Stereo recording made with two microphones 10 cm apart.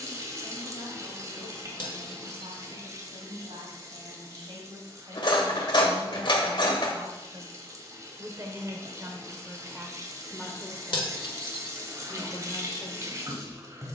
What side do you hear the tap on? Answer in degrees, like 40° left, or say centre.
30° right.